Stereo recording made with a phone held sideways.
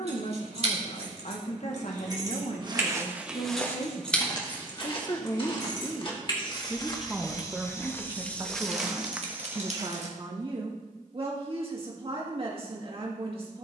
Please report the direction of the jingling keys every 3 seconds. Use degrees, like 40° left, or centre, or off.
40° right, 10° left, 40° left, off, off.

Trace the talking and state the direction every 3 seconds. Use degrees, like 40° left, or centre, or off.
60° left, 40° left, 10° right, 40° right, 40° right.